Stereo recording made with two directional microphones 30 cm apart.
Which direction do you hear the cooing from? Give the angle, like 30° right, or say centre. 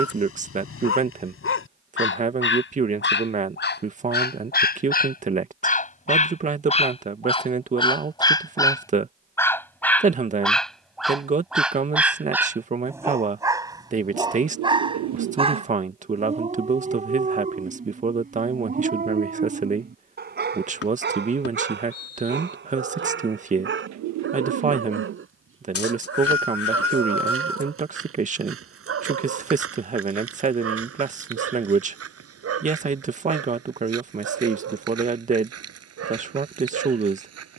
60° right.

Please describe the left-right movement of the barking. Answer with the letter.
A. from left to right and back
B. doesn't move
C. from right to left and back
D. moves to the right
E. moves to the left
D.